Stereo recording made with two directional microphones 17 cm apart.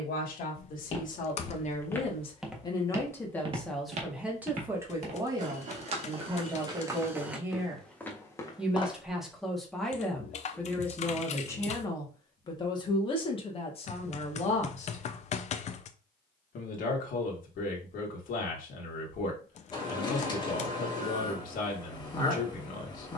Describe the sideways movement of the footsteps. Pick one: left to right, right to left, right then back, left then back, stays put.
right then back.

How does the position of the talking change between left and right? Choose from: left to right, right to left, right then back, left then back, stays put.
right then back.